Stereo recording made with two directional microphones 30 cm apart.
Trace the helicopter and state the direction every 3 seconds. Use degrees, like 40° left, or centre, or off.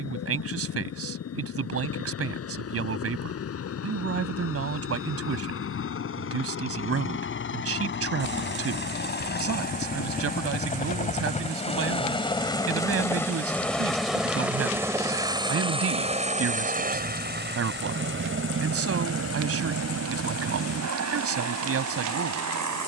50° left, 50° left, 40° left, 30° left, centre, 20° right, 50° right, 60° right.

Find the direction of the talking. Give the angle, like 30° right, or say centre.
50° right.